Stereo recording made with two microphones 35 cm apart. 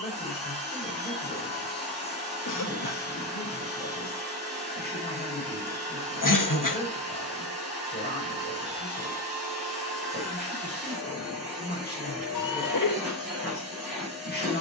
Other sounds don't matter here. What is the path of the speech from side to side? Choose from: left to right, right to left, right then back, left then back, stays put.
stays put.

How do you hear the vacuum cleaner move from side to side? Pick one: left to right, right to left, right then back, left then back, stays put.
stays put.